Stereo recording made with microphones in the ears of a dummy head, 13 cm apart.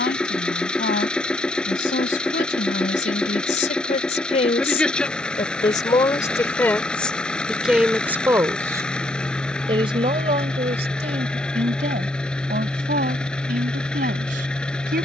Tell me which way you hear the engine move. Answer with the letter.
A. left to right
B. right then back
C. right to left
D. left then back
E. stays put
E.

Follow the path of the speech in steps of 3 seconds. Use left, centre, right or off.
left, left, centre, right, right.